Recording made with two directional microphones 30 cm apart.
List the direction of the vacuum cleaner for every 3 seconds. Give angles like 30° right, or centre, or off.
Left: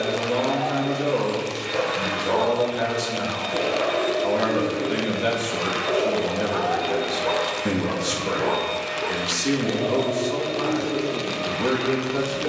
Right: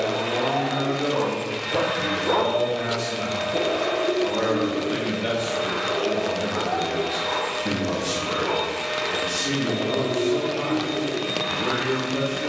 40° right, 10° left, 10° right, 40° right.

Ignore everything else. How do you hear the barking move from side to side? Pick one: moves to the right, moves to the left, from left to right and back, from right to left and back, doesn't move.
moves to the left.